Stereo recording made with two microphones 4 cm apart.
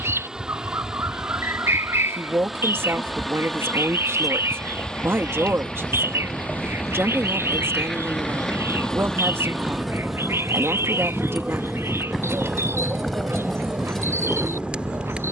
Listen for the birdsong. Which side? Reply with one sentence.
You can hear the birdsong on the right.